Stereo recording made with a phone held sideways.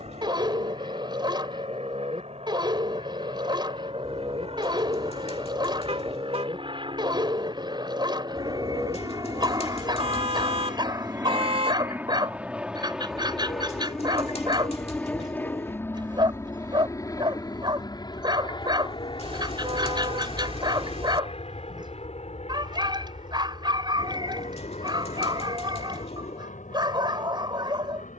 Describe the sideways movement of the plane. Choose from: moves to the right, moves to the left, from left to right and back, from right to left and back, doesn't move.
moves to the left.